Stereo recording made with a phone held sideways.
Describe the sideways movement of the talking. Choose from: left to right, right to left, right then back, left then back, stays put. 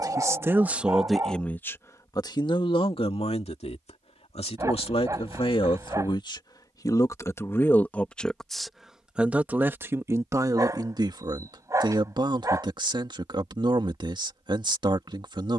left then back.